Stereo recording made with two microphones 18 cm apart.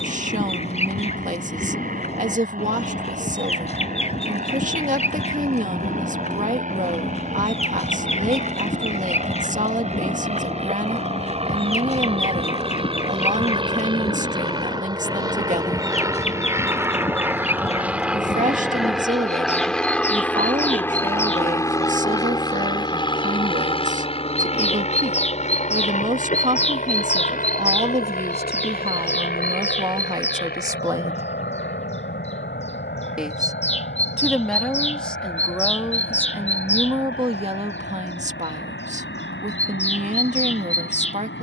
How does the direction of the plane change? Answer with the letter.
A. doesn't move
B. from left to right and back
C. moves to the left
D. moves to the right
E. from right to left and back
C.